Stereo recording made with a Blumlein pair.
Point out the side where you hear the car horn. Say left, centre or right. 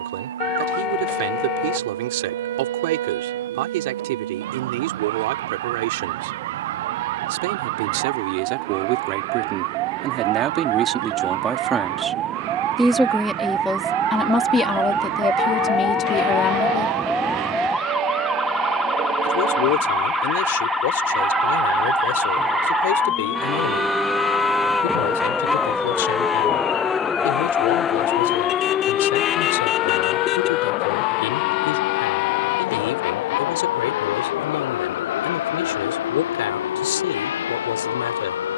left.